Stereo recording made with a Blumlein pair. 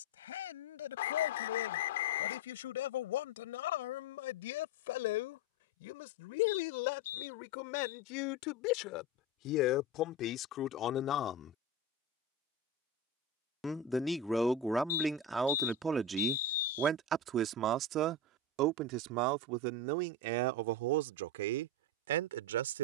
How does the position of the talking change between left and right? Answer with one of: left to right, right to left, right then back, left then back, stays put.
left to right.